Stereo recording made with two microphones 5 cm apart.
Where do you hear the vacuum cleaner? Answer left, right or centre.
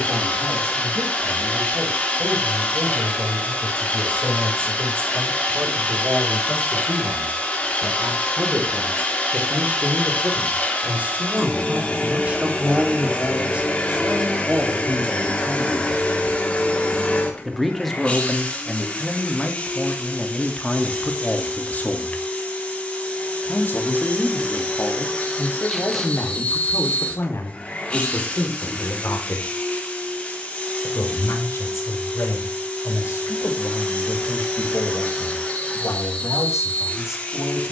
left.